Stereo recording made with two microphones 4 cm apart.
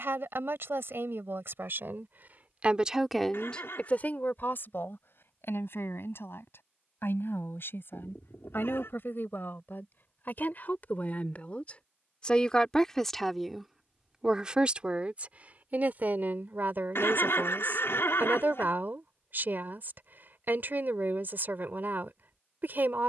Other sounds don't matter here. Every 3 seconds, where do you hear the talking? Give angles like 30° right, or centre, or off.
60° right, 40° left, 60° left, 50° left, centre, 50° right, 50° right, 50° right.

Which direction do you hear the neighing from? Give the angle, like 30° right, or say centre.
70° left.